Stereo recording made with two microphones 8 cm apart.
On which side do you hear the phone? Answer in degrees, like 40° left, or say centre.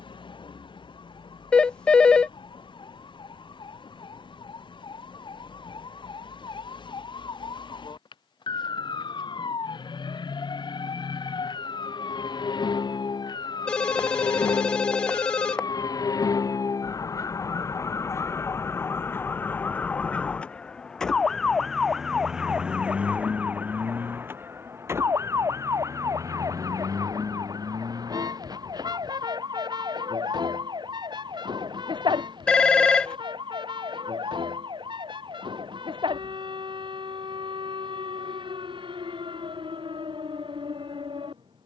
10° left.